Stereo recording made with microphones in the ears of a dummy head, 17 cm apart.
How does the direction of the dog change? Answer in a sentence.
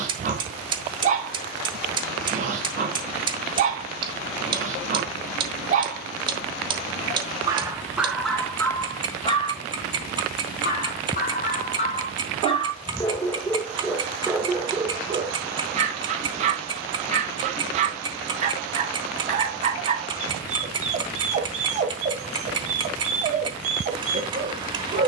In this clip you hear the dog move from right to left and back again.